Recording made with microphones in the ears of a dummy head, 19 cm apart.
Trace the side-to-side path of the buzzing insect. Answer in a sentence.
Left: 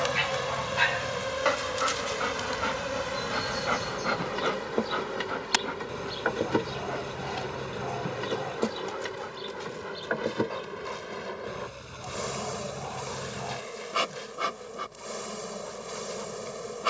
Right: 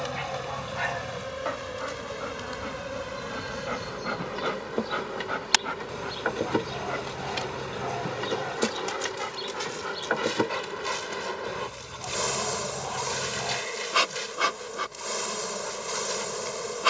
In this clip you hear the buzzing insect go from the left side to the right.